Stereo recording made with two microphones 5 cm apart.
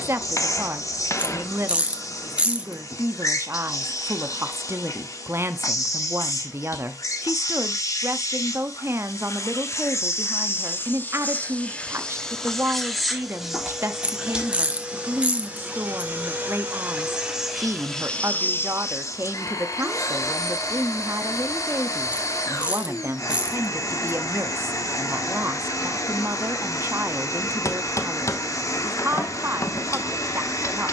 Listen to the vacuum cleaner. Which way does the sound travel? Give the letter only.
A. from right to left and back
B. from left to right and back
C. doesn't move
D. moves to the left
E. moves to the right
B.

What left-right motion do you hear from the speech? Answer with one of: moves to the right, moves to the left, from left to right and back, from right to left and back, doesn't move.
doesn't move.